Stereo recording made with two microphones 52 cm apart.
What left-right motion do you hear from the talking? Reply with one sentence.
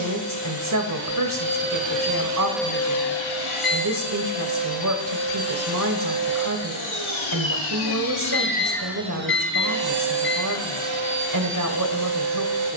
In this clip you hear the talking stay in one place.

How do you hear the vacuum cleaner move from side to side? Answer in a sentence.
In this clip you hear the vacuum cleaner go left and come back.